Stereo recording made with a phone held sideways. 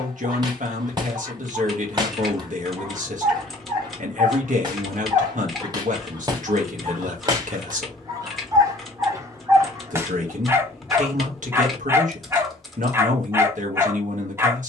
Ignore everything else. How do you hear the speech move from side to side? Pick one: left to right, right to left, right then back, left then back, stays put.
stays put.